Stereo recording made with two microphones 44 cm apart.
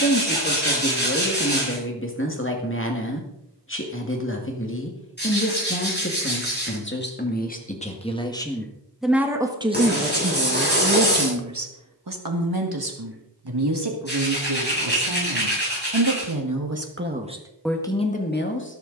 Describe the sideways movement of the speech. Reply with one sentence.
In this clip you hear the speech move from left to right and back again.